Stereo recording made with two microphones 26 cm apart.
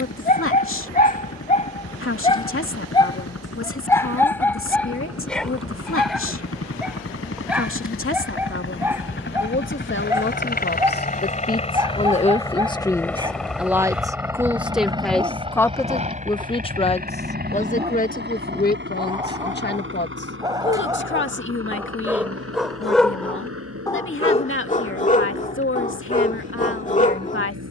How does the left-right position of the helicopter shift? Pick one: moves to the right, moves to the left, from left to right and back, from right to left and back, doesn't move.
moves to the right.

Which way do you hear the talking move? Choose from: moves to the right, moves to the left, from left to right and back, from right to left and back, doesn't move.
from left to right and back.